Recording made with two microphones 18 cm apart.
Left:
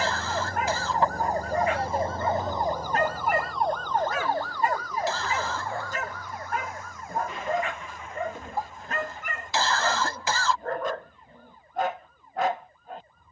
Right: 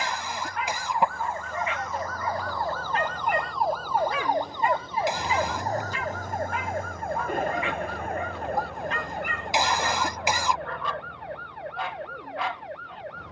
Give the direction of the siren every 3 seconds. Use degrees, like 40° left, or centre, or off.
40° left, 20° right, 60° right, 70° right, 70° right.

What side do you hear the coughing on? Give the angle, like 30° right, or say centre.
20° right.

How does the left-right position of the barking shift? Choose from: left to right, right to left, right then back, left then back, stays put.
stays put.